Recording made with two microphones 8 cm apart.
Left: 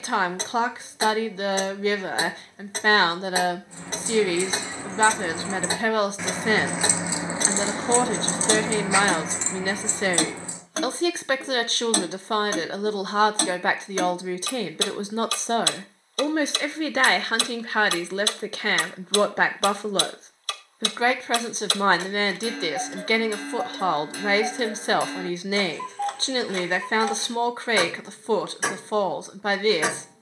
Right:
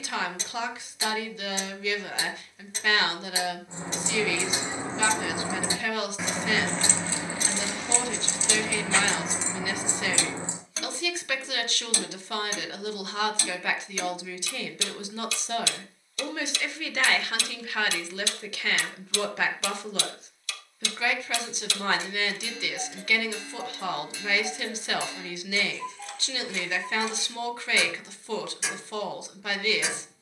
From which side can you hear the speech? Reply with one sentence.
In this clip you hear the speech on the left.